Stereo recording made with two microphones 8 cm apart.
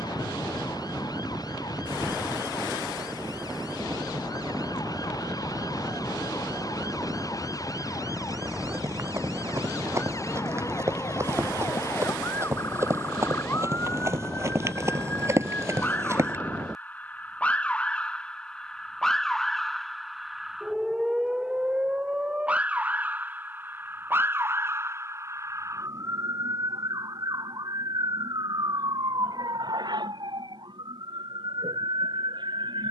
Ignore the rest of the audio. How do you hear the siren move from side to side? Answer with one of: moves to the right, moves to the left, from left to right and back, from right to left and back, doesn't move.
moves to the right.